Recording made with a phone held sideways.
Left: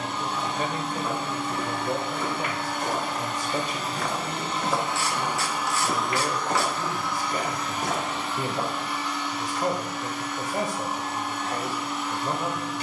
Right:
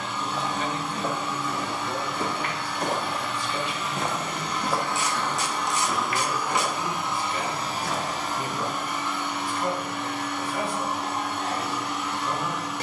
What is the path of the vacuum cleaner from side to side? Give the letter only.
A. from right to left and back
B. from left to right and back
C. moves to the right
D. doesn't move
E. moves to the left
C.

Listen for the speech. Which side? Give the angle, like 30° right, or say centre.
40° left.